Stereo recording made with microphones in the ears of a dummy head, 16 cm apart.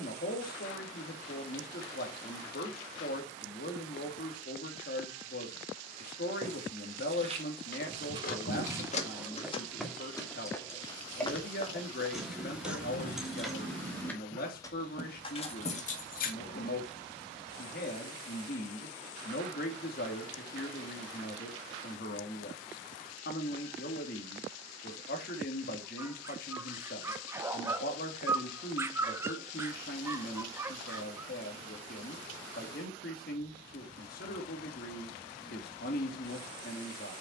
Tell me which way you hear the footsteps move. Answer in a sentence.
In this clip you hear the footsteps go from the right side to the left.